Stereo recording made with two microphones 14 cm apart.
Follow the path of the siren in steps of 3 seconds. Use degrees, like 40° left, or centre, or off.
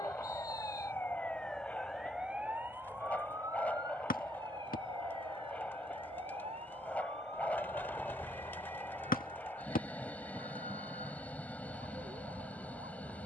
10° left, 30° right, 50° right, 50° right, 60° right.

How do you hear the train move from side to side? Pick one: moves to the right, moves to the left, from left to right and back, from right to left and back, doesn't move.
doesn't move.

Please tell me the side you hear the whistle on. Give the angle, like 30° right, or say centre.
80° left.